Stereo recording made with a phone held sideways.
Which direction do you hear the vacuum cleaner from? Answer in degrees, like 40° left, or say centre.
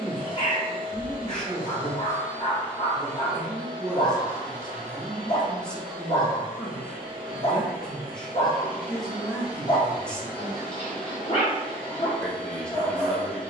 60° left.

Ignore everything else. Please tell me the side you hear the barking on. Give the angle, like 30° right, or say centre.
40° left.